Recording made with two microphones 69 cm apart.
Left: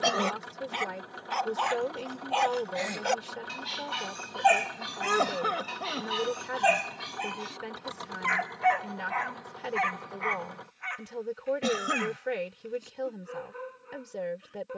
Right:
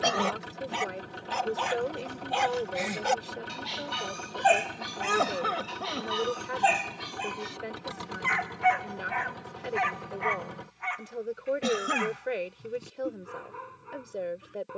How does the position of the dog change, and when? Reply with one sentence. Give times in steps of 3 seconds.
You can hear the dog on the right from 0 s, in the centre from 3 s and on the right from 9 s.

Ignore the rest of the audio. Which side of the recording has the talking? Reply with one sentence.
You can hear the talking on the left.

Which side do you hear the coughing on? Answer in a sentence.
You can hear the coughing in the centre.